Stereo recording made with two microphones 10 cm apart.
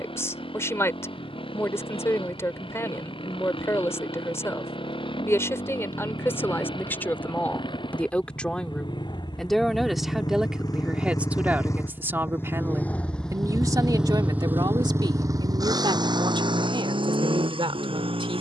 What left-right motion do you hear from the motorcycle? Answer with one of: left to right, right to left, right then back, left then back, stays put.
left to right.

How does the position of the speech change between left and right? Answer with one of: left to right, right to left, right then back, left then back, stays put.
left to right.